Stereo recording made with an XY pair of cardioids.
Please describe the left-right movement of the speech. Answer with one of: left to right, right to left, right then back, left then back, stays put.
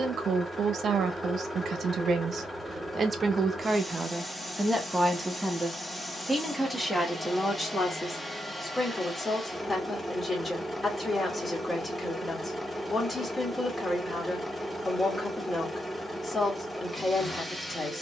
right to left.